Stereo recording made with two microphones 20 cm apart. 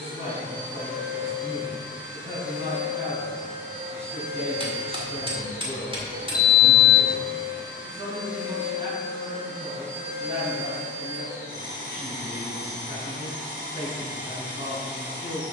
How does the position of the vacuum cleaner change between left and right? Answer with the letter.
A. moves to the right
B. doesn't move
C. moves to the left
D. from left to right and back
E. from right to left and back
B.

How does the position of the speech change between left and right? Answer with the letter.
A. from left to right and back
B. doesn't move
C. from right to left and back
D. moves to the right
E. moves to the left
B.